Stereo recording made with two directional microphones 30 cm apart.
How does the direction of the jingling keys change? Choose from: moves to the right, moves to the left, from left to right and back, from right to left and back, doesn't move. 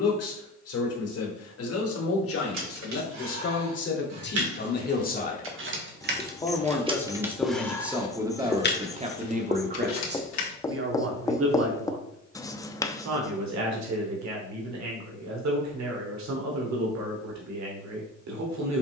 moves to the left.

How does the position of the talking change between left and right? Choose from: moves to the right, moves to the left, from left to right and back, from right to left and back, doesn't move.
moves to the right.